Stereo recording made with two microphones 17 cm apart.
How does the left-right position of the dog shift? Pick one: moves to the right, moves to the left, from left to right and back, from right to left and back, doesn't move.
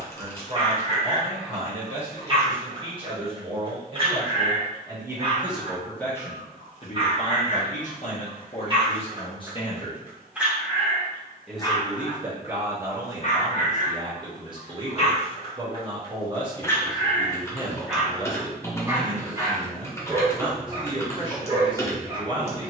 from right to left and back.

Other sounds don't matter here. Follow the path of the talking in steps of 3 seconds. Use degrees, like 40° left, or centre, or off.
40° right, 20° right, 40° left, 20° left, 20° right, 30° right, 30° right, 30° right.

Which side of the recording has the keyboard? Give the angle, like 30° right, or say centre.
20° left.